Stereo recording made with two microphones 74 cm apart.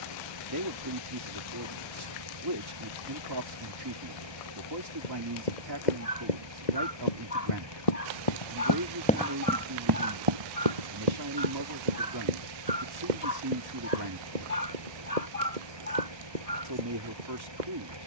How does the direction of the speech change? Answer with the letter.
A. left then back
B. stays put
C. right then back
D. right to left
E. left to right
B.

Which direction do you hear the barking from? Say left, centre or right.
left.